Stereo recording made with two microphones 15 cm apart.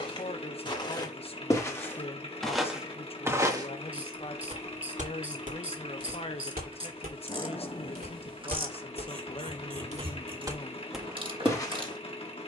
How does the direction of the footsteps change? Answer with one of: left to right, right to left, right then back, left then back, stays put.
right then back.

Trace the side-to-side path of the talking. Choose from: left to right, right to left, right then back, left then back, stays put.
stays put.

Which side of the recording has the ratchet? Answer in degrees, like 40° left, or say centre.
40° right.